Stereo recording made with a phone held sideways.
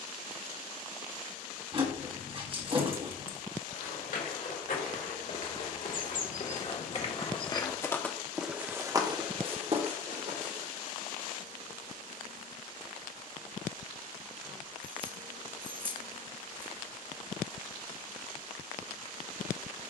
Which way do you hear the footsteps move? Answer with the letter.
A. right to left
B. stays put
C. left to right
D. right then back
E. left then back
C.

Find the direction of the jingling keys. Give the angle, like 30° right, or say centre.
40° right.